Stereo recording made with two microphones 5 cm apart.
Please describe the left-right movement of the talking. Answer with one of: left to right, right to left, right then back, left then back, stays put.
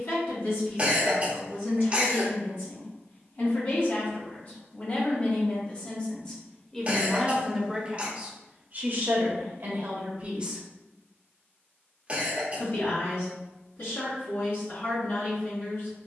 right then back.